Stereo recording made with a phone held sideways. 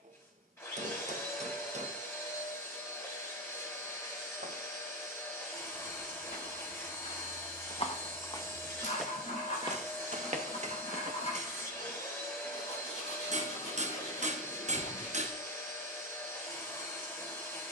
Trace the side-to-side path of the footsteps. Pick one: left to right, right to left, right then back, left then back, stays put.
left to right.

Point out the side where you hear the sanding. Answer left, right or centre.
left.